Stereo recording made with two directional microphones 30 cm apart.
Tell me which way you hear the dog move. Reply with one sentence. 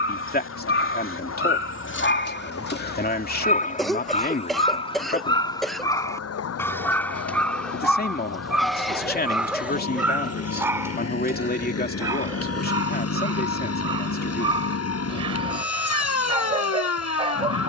You can hear the dog move to the right.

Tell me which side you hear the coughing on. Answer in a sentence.
You can hear the coughing in the centre.